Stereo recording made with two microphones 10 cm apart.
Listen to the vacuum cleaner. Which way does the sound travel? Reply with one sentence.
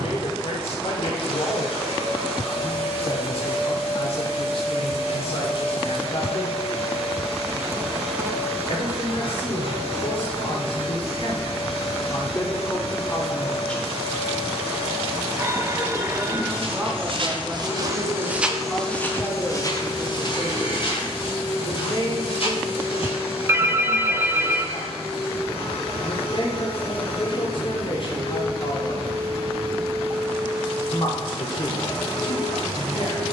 In this clip you hear the vacuum cleaner stay in one place.